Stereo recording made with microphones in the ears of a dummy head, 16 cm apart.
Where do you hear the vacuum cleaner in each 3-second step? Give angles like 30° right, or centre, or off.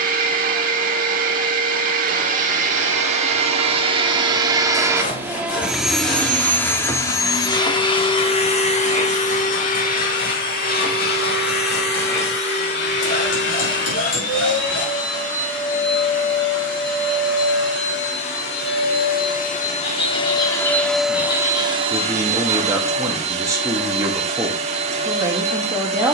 50° right, 20° right, 20° left, 50° left, 60° left, 70° left, 40° left, 30° right, 40° right.